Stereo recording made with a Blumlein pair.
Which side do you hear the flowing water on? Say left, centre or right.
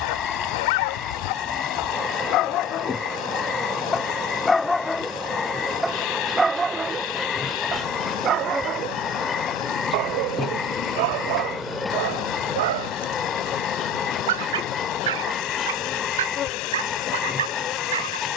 left.